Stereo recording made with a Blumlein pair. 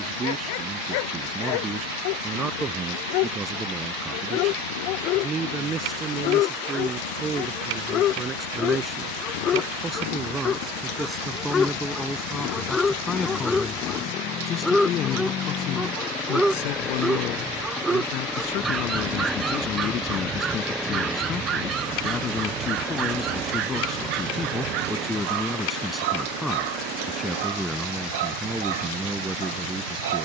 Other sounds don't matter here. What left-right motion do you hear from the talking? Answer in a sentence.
You can hear the talking go left and come back.